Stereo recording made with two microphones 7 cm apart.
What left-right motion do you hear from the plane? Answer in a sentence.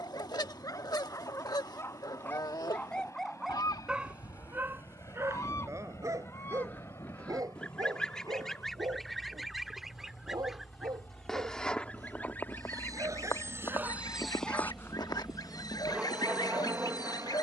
In this clip you hear the plane travel towards the right.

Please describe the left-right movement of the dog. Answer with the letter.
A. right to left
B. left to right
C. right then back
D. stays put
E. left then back
C.